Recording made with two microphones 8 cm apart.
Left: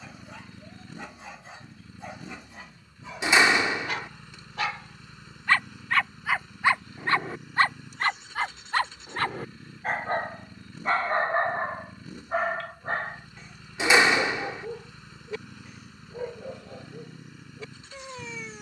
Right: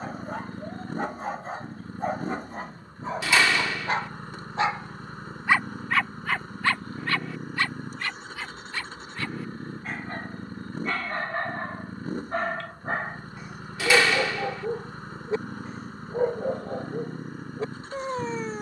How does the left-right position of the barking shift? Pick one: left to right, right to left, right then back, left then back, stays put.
left then back.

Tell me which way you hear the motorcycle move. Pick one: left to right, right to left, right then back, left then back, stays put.
stays put.